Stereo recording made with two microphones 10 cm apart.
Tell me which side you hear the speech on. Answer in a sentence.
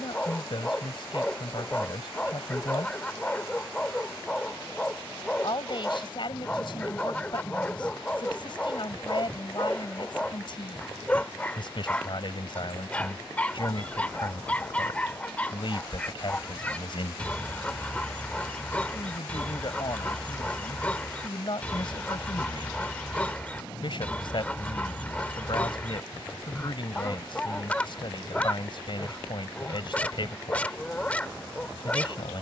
You can hear the speech on the left.